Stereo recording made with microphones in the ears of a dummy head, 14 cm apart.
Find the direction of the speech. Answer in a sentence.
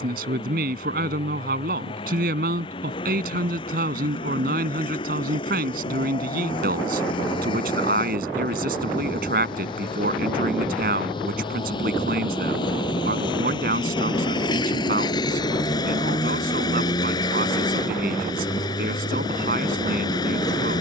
In this clip you hear the speech on the right.